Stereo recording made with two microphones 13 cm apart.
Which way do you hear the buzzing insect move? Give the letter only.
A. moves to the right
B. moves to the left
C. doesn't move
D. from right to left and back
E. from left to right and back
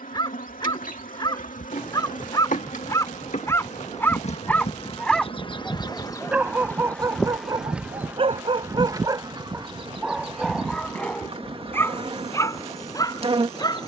A.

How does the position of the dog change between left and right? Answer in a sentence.
You can hear the dog move from left to right and back again.